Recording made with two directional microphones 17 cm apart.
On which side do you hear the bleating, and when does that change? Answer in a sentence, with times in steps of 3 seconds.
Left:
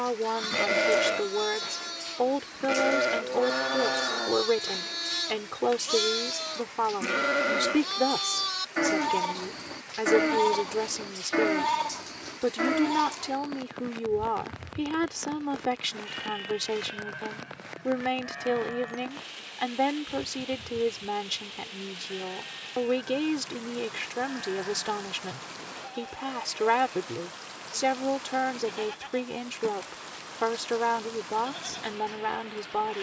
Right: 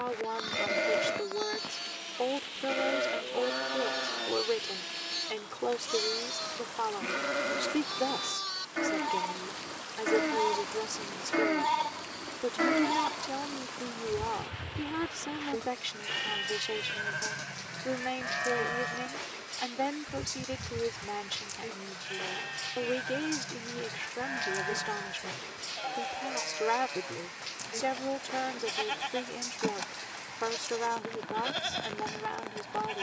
You can hear the bleating on the left from 0 s, in the centre from 12 s and on the right from 15 s.